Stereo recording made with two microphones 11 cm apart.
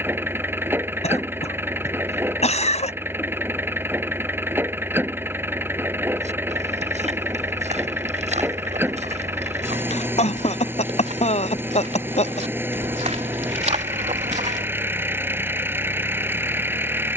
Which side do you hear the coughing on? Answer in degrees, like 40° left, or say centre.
70° left.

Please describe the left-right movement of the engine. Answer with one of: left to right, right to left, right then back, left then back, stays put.
stays put.